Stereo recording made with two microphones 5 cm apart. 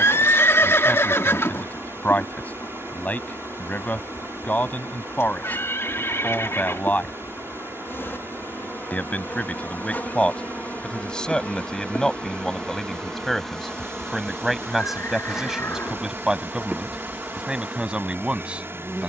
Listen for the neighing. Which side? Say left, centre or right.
left.